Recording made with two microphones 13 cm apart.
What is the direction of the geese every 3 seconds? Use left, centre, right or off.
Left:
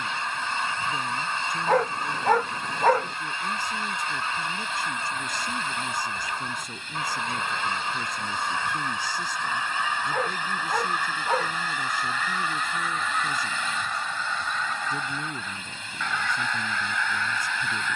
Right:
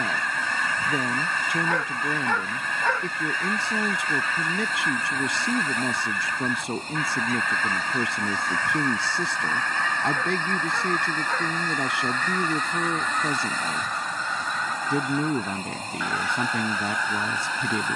left, left, left, centre, centre, centre.